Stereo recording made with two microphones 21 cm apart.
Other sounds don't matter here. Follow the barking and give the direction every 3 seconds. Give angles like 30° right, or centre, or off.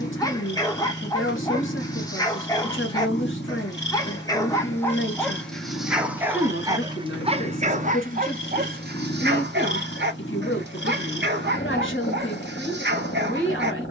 20° left, 10° left, 30° right, 60° right, 60° right.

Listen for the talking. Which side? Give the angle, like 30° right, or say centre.
70° left.